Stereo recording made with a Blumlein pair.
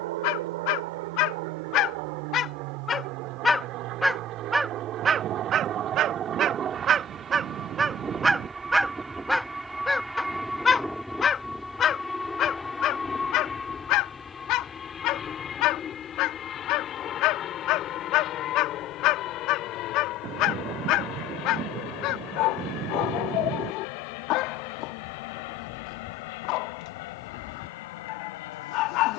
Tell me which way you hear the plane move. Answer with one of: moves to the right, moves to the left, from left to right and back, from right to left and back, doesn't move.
moves to the left.